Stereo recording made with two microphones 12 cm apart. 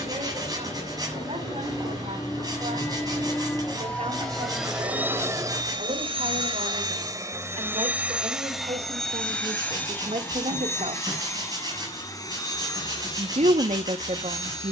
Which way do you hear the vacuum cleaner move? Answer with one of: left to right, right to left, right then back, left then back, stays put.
right then back.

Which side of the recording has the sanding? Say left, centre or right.
right.